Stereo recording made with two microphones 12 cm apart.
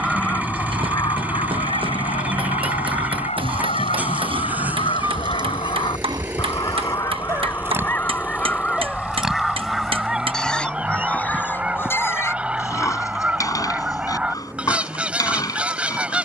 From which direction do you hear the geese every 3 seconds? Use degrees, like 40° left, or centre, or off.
50° left, 60° left, 20° left, 10° right, 10° right, 10° right.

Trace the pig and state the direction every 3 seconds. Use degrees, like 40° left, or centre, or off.
50° right, 40° right, 20° right, 10° left, 30° left, 30° left.